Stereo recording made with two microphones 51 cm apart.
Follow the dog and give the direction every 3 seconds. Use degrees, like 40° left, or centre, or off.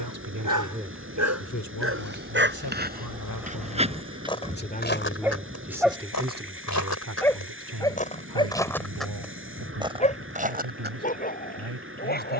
30° right, 10° right, 10° left, 10° left.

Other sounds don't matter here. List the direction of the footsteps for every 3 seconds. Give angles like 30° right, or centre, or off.
20° right, 10° left, 20° left, 10° right.